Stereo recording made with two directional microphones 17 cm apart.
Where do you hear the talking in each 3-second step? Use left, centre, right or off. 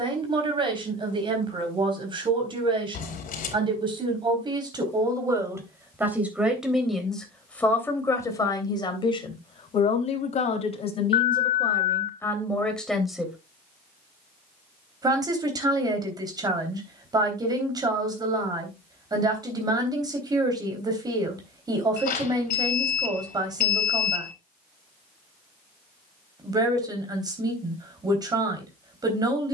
right, right, centre, left, centre, right, right, right, right, right.